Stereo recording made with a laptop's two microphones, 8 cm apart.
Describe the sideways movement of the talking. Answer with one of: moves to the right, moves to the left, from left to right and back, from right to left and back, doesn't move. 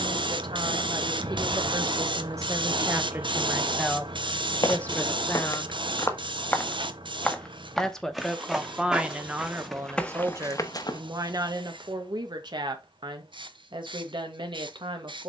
from right to left and back.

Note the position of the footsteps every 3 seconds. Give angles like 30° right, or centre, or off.
off, 50° left, centre, 10° left, off.